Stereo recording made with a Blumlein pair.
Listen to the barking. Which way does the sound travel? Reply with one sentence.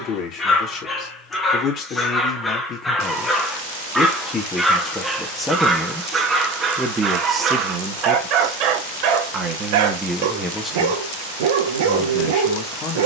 In this clip you hear the barking travel towards the right.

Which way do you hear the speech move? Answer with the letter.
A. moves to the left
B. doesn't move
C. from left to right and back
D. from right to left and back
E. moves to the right
C.